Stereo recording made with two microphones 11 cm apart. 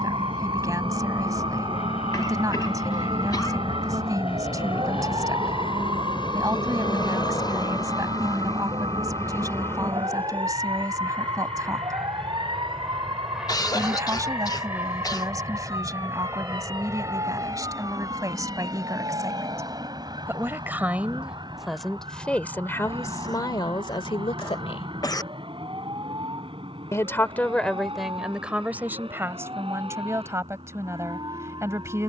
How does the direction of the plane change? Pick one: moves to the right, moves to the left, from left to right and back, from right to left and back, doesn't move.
moves to the right.